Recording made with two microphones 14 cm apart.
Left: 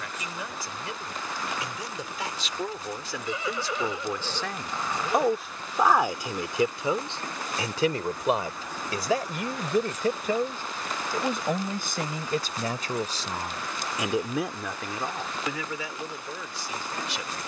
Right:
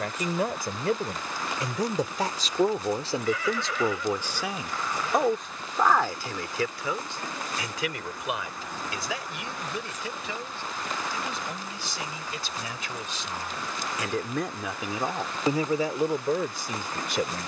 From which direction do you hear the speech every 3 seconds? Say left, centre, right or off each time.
right, centre, left, left, left, right.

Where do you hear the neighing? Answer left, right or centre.
left.